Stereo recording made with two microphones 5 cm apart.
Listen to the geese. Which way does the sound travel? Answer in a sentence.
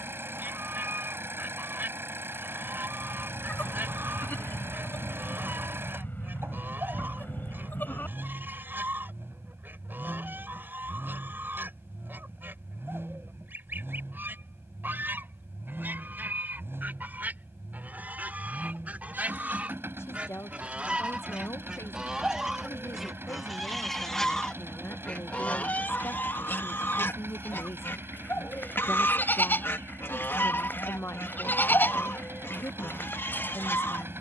In this clip you hear the geese move from right to left.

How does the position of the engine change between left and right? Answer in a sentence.
You can hear the engine stay put.